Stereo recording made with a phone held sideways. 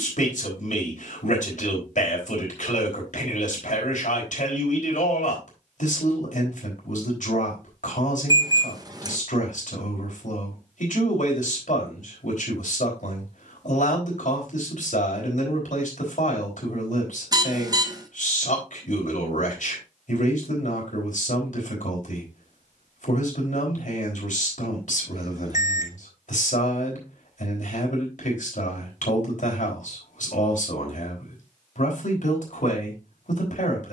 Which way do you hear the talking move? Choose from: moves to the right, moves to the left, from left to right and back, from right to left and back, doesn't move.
doesn't move.